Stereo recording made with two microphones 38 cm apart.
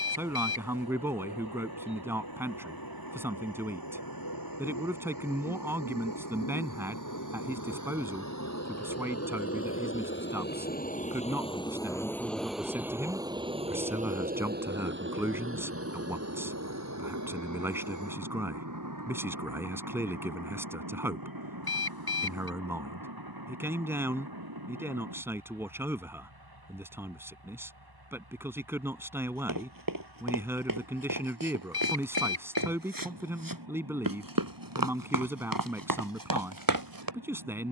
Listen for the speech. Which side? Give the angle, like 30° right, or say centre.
10° right.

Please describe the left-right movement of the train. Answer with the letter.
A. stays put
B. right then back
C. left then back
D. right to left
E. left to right
E.